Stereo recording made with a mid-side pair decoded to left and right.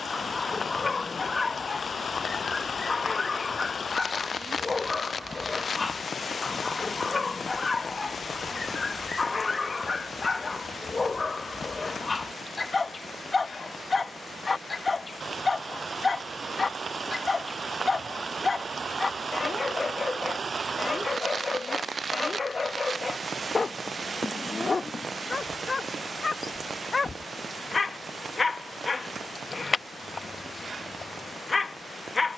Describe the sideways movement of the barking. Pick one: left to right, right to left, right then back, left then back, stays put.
stays put.